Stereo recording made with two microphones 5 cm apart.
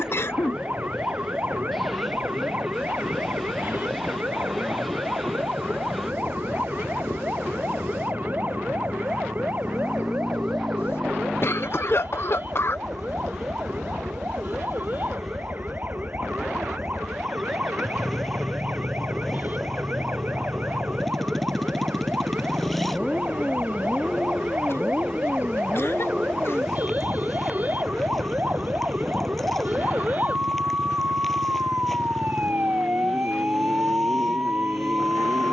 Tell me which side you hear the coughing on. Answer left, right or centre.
left.